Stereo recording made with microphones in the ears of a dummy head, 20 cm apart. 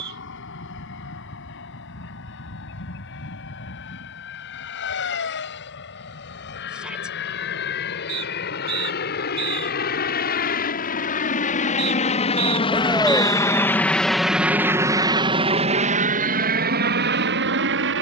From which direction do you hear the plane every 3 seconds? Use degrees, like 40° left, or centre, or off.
70° left, 70° left, 60° left, 50° left, 10° left, 40° right.